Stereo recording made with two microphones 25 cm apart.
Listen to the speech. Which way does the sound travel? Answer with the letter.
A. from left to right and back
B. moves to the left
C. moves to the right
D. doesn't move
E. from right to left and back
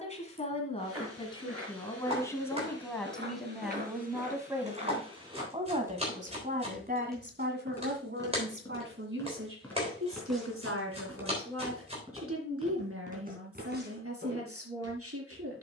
C.